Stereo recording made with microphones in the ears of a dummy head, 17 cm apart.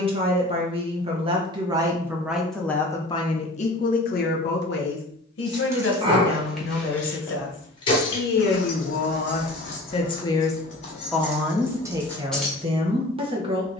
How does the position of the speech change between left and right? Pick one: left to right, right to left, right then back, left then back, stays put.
left then back.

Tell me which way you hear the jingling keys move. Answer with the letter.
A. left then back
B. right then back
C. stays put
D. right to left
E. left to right
A.